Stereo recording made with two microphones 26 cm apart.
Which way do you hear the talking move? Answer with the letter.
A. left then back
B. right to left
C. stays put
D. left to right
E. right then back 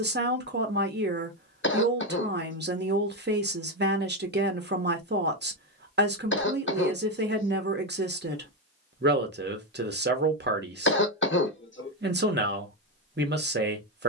C.